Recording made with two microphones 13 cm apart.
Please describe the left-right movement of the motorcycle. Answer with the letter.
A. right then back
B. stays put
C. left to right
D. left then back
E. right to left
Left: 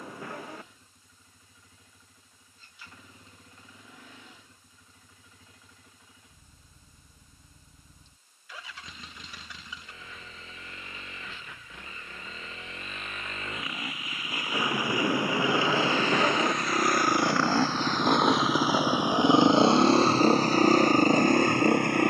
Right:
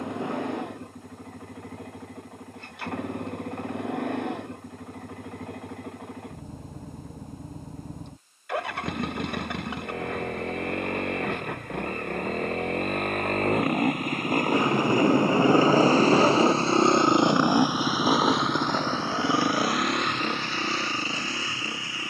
E.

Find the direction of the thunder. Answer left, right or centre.
right.